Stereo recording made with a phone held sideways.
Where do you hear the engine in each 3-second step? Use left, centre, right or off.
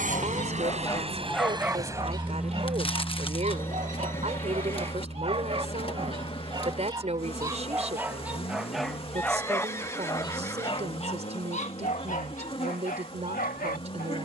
right, left, left, left, left.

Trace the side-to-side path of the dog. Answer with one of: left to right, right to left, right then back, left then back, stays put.
right then back.